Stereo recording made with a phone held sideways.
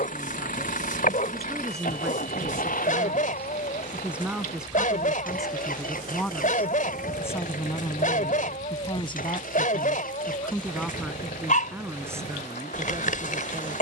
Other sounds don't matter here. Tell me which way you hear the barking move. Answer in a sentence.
You can hear the barking stay in one place.